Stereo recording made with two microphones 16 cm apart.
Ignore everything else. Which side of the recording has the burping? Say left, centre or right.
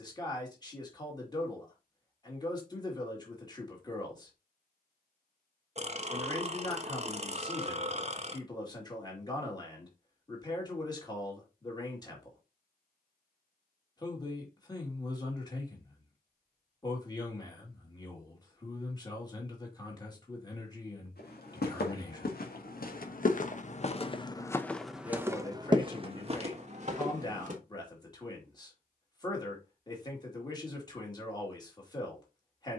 right.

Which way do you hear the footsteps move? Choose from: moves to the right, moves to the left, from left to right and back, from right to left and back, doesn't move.
moves to the right.